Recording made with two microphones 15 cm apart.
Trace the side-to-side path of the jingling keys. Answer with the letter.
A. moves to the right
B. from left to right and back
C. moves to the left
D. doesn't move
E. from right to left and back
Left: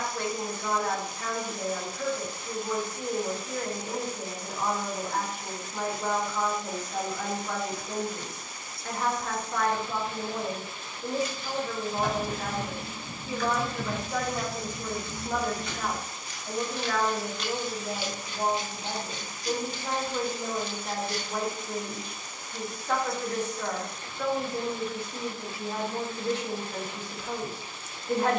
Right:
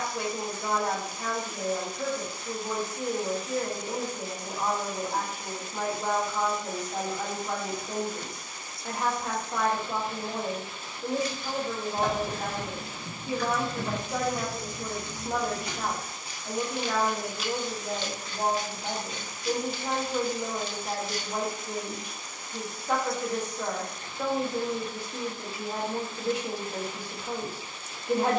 C.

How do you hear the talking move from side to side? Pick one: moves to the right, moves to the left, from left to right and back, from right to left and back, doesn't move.
doesn't move.